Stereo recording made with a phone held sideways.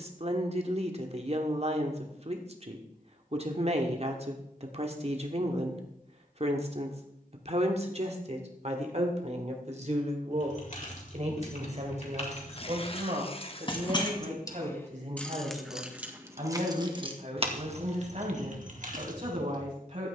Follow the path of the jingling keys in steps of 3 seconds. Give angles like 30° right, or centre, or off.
off, off, off, 50° left, 30° left, 20° right, 60° right.